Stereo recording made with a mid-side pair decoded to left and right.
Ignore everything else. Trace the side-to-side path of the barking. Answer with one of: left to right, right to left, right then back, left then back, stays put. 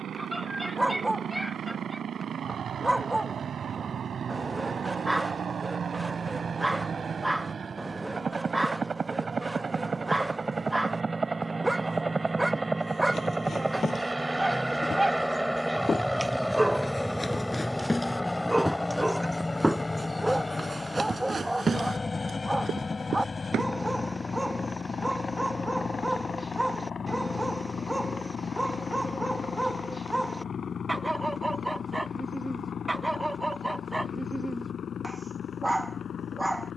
stays put.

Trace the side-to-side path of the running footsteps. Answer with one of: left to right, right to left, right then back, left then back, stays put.
left to right.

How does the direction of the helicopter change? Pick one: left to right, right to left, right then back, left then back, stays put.
right to left.